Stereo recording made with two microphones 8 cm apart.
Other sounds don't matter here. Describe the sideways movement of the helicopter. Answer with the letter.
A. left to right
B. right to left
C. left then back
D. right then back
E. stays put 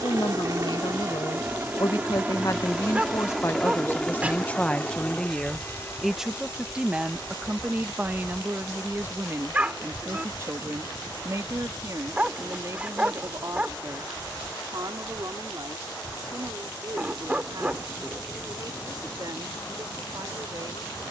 B.